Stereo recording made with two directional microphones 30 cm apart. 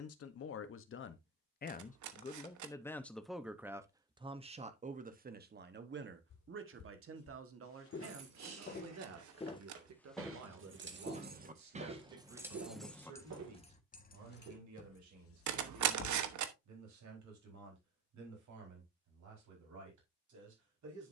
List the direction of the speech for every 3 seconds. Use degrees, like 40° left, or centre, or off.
30° left, 20° right, 50° right, 60° right, 60° right, 70° right, 70° right.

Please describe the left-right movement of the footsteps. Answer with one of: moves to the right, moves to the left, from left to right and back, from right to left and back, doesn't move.
moves to the right.